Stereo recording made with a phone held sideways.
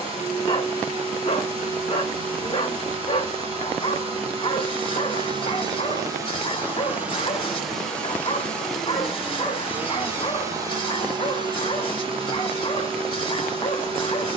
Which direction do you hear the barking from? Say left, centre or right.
left.